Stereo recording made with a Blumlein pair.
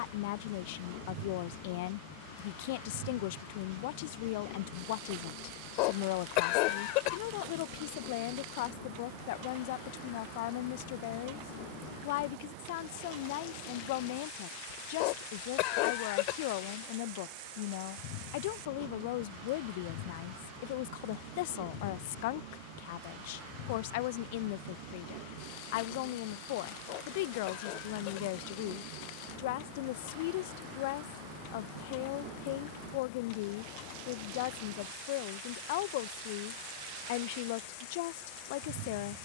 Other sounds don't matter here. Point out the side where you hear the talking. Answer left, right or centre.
left.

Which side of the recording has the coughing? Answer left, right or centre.
left.